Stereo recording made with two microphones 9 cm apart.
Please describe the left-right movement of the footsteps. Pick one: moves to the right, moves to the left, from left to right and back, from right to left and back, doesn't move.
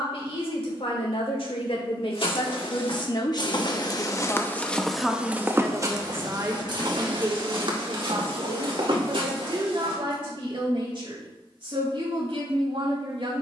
moves to the right.